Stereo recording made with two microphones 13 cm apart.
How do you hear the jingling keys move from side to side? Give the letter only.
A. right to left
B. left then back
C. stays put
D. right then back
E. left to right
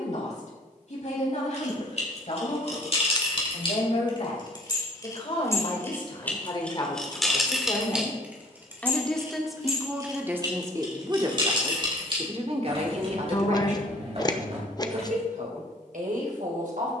E.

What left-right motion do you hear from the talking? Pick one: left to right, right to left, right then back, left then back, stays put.
left to right.